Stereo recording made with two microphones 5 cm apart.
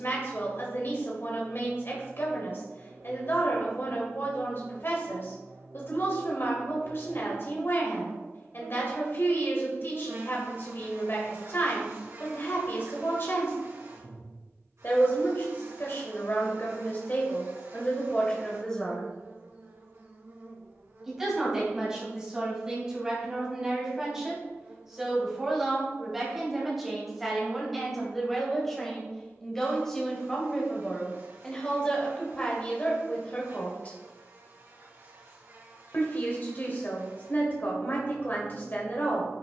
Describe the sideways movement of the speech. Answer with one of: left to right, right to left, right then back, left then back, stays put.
right then back.